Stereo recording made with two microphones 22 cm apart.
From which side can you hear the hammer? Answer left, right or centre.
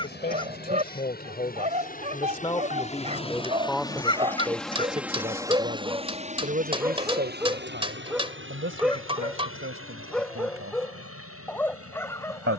right.